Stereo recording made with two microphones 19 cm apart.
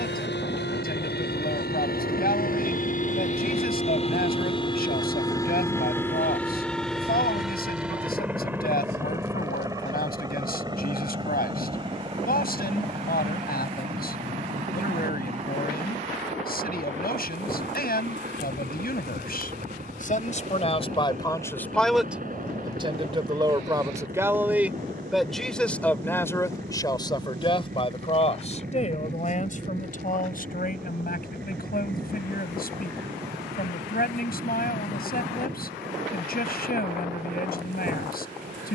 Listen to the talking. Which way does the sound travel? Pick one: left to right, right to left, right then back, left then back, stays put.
right then back.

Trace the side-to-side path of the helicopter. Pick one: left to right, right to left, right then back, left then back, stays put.
left to right.